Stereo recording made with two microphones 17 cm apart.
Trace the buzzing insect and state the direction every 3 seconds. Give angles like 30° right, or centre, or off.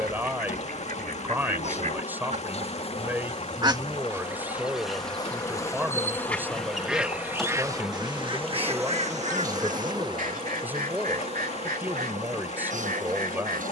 40° left, 30° left, centre, 30° right, 50° right.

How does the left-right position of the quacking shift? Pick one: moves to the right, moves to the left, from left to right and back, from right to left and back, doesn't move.
from right to left and back.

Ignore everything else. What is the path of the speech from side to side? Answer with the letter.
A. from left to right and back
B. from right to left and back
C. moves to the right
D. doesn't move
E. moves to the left
D.